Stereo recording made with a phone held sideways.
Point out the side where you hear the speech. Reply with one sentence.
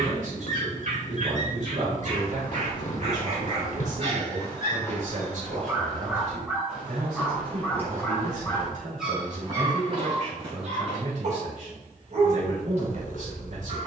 In this clip you hear the speech on the right.